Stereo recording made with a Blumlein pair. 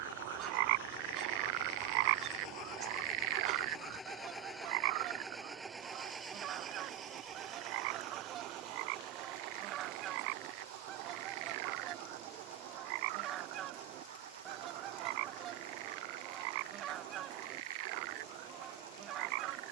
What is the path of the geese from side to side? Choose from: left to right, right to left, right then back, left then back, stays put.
stays put.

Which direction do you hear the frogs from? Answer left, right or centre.
right.